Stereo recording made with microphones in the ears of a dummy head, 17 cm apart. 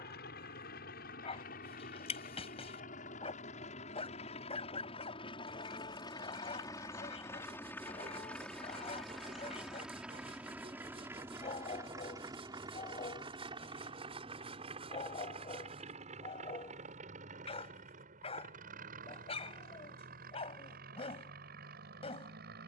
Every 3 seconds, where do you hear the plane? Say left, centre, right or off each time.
left, left, centre, centre, right, right, right, right.